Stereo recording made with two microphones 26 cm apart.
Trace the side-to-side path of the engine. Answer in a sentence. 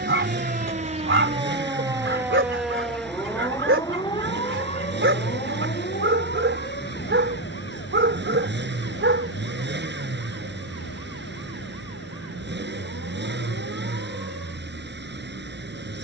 You can hear the engine stay in one place.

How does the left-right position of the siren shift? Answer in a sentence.
You can hear the siren travel towards the left.